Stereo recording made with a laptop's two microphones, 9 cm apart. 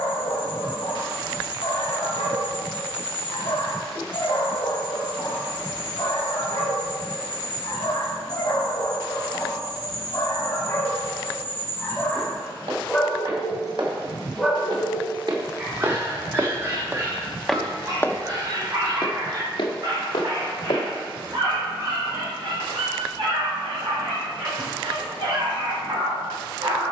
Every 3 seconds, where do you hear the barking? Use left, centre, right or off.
left, left, left, left, centre, right, right, right, right.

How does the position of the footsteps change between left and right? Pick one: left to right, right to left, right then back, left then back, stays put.
right to left.